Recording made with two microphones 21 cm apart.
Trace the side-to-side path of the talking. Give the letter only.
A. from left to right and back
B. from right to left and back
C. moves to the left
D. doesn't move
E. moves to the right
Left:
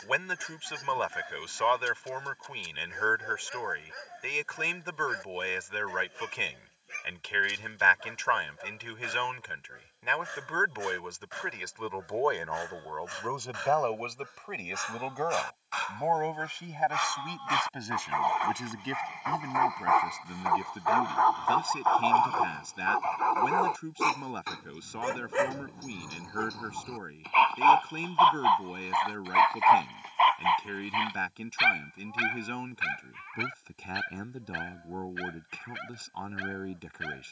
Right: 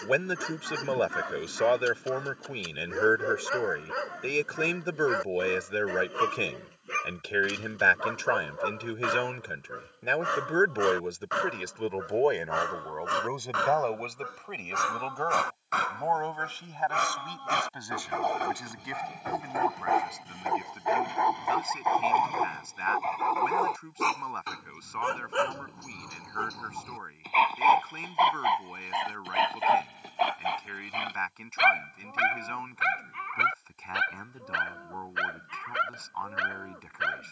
C.